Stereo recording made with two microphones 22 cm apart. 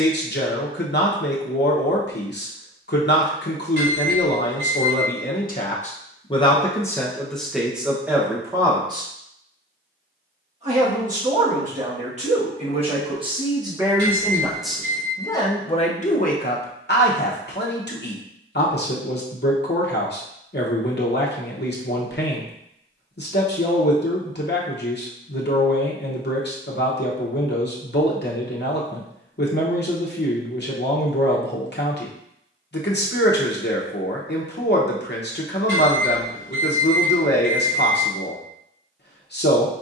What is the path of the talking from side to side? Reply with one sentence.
You can hear the talking move from left to right and back again.